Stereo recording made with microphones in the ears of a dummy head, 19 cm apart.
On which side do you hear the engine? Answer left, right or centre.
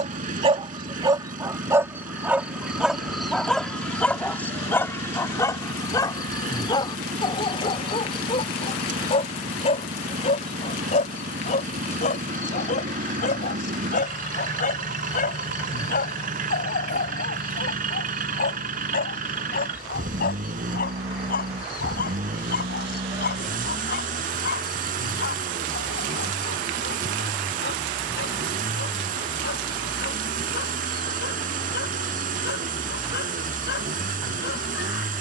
right.